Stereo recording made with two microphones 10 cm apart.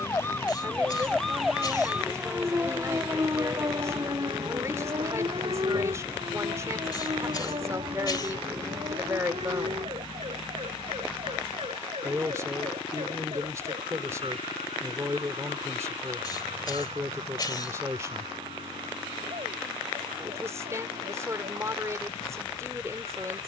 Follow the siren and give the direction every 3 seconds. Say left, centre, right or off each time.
centre, right, right, right, right, right, right, right.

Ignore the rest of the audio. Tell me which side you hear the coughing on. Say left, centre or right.
left.